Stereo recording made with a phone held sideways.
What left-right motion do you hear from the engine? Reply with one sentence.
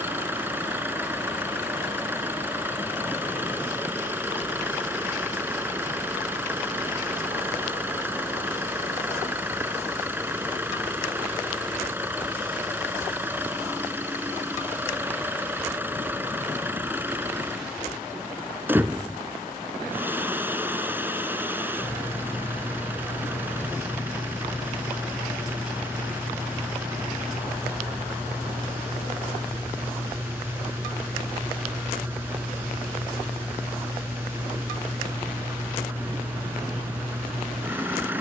You can hear the engine stay in one place.